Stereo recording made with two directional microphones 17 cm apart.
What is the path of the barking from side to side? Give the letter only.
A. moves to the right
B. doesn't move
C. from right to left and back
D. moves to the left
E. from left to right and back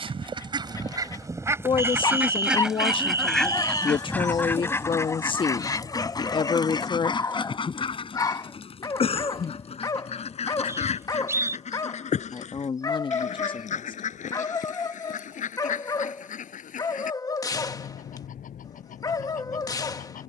B.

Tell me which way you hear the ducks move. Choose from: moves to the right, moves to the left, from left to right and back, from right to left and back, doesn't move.
moves to the left.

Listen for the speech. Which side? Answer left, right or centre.
left.